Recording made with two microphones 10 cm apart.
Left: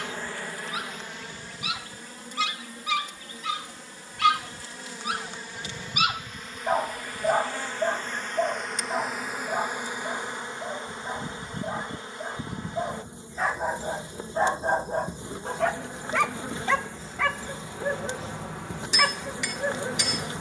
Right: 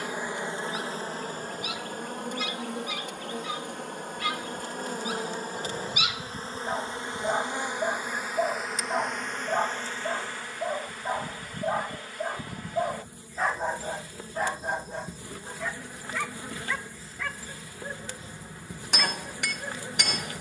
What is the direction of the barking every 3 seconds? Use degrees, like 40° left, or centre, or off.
80° left, 60° left, 20° left, 20° right, 10° left, 70° left, 80° left.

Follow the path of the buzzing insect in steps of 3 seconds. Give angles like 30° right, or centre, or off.
40° right, 50° right, 20° right, 20° left, 20° left, 20° left, 20° left.